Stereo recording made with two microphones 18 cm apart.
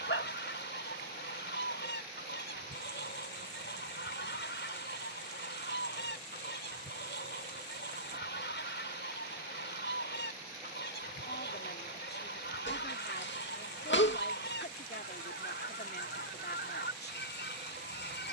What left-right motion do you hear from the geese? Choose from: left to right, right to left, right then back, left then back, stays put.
stays put.